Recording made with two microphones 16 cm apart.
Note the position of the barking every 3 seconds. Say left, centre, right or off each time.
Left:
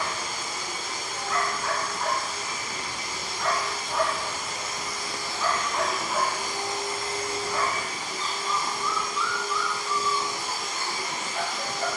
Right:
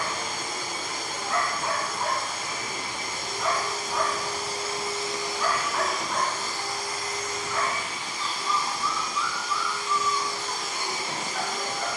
right, centre, left, left.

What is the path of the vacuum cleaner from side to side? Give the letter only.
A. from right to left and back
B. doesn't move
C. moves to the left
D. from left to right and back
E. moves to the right
A.